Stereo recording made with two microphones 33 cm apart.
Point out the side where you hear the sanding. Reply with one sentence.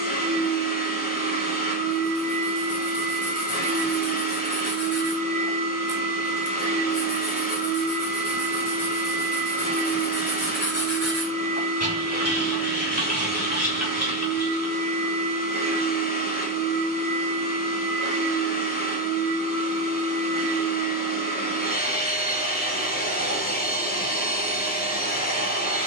You can hear the sanding on the left.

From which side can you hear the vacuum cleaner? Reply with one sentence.
You can hear the vacuum cleaner on the left.